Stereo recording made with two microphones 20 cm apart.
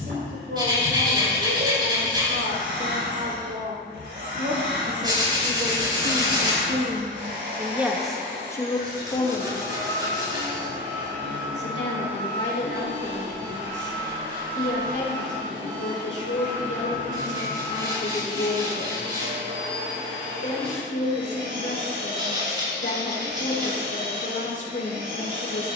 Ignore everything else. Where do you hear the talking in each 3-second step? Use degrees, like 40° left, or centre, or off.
70° right, 60° right, 20° right, 50° left, 70° left, 70° left, 70° left, 70° left, 70° left.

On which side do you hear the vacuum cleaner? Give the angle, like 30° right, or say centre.
70° right.